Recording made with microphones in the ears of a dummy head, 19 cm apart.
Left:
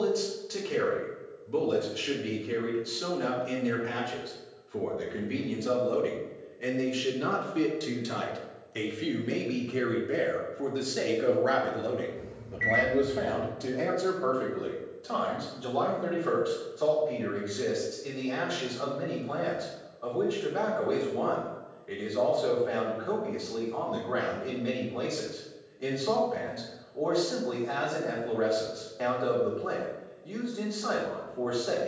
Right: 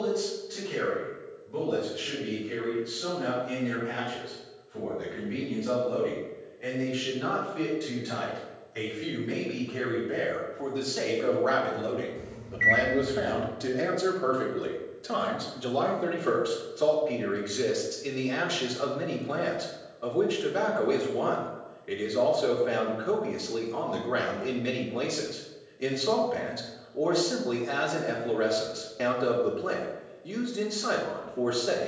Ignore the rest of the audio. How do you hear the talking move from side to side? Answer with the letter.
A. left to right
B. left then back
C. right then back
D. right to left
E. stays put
A.